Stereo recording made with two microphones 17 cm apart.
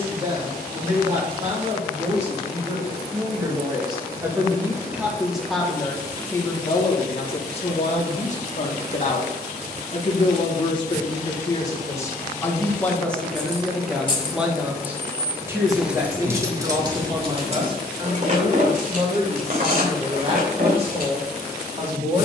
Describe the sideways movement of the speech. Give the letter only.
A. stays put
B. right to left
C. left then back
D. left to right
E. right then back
C.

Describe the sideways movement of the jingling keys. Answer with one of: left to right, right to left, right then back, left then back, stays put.
left to right.